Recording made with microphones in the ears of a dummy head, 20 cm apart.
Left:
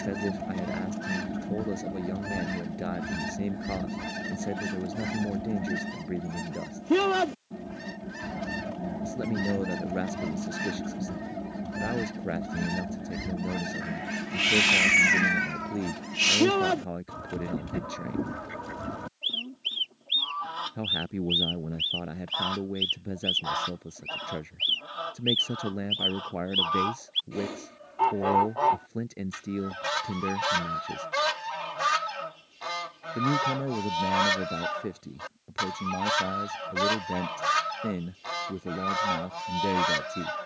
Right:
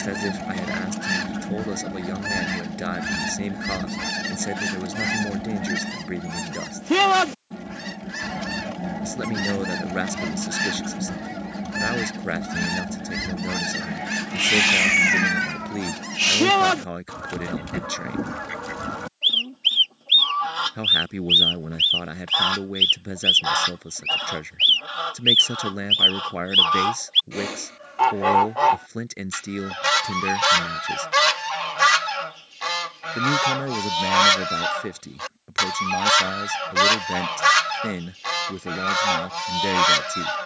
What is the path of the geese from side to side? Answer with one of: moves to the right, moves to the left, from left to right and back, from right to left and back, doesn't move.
doesn't move.